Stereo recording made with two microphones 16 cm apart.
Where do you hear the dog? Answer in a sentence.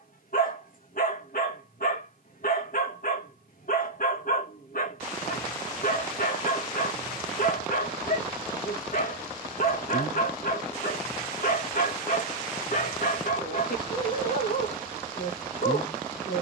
You can hear the dog on the left.